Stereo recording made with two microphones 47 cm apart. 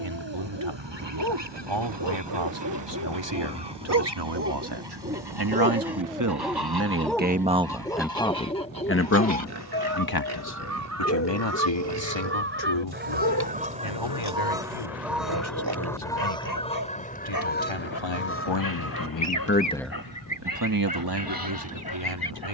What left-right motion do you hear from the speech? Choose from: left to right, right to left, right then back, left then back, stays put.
left then back.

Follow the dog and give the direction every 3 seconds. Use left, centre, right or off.
right, right, centre, left, left, left, left, left.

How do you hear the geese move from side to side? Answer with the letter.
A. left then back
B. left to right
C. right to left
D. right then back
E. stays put
C.